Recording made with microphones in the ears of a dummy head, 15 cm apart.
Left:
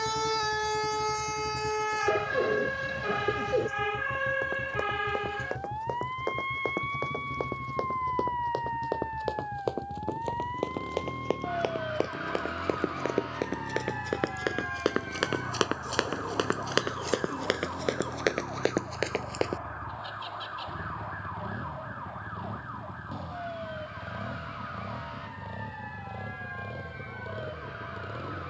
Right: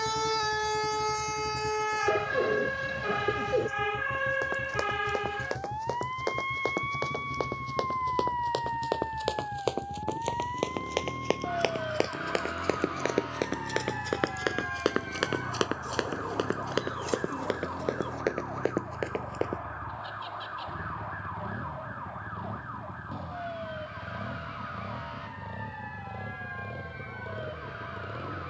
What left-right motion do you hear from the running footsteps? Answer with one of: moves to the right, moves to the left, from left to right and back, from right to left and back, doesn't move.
moves to the left.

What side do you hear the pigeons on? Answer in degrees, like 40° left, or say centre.
centre.